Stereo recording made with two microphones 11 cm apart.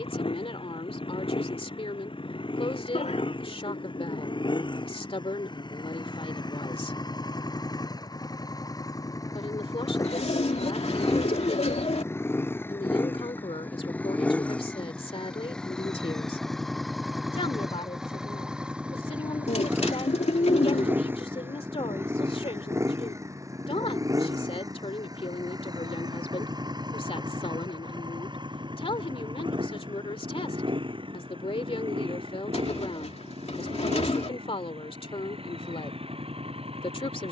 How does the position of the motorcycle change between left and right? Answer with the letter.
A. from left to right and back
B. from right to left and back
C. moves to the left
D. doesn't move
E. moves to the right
E.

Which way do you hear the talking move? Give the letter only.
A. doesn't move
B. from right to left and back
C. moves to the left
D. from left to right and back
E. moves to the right
A.